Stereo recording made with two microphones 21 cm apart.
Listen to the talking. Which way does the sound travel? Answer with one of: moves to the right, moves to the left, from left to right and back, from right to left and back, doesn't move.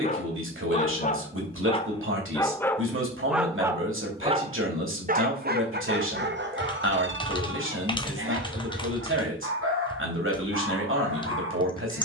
doesn't move.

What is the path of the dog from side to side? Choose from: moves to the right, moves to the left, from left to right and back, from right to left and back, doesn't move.
moves to the right.